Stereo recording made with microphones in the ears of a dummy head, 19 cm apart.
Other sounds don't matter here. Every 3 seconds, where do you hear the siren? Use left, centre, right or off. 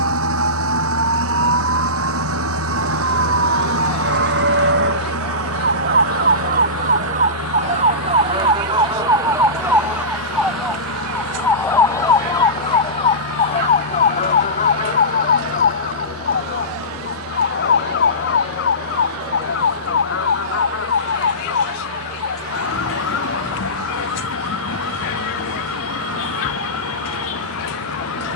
right, right, right, centre, left, left, left, left, left, left.